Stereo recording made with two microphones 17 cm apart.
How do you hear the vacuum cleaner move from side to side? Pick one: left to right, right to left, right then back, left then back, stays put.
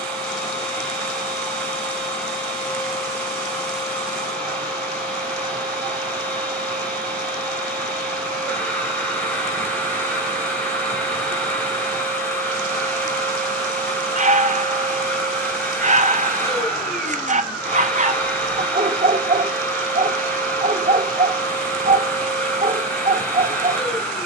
stays put.